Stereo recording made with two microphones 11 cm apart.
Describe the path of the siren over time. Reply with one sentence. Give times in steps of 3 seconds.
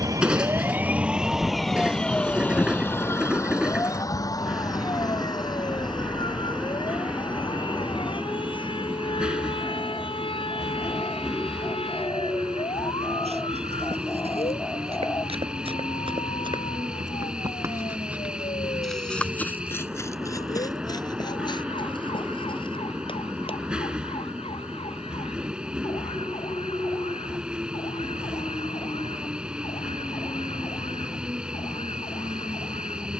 You can hear the siren in the centre from 0 s and on the left from 3 s.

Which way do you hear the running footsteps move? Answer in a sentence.
You can hear the running footsteps travel towards the left.